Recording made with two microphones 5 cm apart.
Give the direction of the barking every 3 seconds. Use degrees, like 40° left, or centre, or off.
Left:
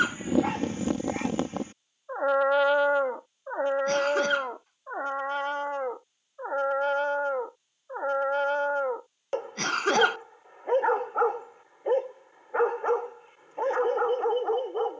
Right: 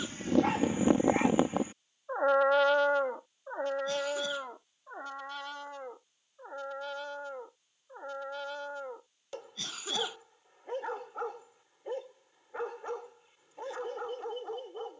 centre, 40° left, 50° left, 50° left, 50° left.